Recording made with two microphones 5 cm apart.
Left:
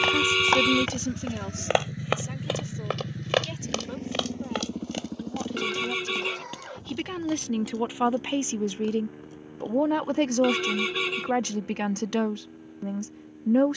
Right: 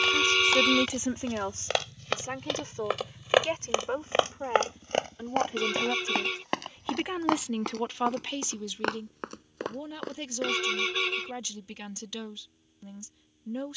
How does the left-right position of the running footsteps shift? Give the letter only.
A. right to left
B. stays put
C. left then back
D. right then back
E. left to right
E.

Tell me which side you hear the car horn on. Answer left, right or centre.
centre.